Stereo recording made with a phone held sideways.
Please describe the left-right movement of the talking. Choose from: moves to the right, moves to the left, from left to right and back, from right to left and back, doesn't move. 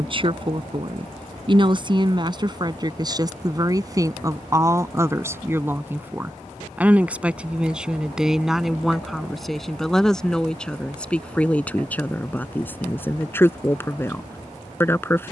moves to the left.